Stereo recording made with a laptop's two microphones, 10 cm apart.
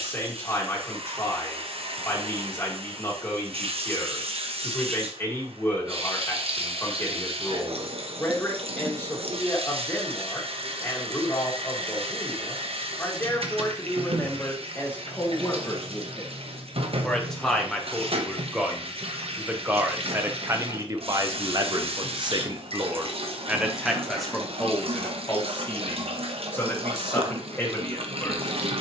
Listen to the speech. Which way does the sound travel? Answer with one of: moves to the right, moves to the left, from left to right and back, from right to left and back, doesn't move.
from left to right and back.